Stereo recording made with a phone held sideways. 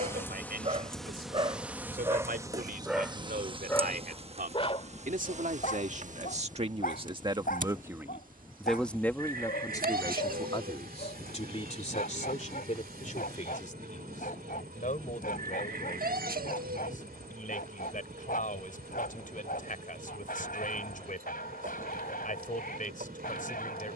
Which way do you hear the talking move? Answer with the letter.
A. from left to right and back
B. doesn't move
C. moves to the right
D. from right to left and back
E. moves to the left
E.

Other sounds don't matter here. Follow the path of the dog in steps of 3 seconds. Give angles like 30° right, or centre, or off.
30° right, 30° left, 70° left, 70° left, 70° left, 70° left, 70° left, 70° left.